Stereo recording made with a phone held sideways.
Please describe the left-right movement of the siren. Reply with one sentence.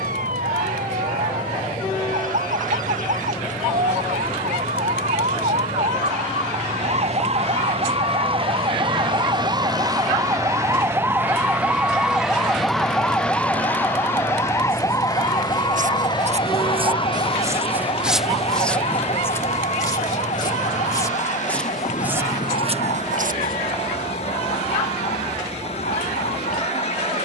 You can hear the siren move to the left.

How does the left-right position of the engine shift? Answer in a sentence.
In this clip you hear the engine stay put.